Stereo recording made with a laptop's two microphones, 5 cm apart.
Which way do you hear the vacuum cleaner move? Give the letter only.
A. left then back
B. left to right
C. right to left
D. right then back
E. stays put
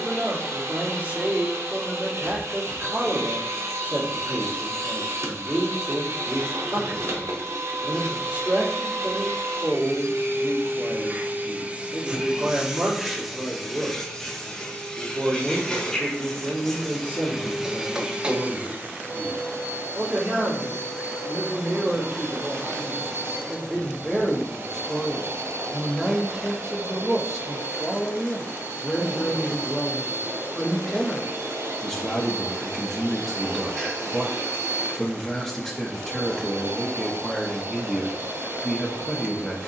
A.